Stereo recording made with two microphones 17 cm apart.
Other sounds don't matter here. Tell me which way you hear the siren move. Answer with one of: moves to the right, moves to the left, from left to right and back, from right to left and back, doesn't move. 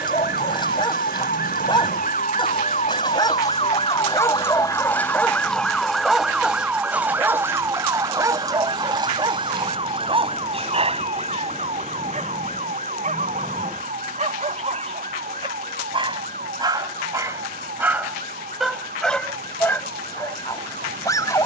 moves to the right.